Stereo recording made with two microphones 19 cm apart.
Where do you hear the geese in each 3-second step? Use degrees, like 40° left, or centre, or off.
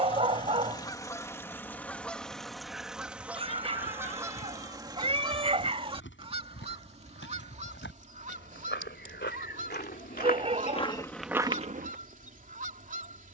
10° left, 20° right, 30° right, 40° right, 40° right.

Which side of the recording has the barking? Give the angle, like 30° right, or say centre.
30° right.